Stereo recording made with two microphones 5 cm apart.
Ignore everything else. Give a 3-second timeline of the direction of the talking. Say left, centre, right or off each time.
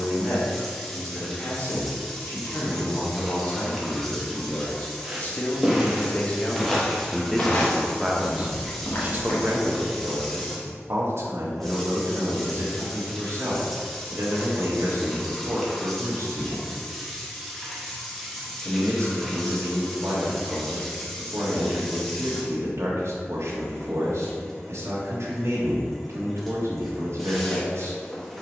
left, left, centre, right, right, right, right, right, right, right.